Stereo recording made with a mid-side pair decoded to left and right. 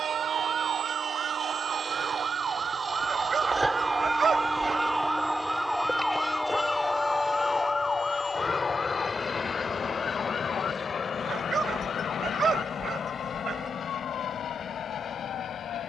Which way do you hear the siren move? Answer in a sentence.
You can hear the siren go from the right side to the left.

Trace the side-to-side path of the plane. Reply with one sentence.
You can hear the plane move from right to left.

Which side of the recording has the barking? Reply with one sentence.
In this clip you hear the barking on the right.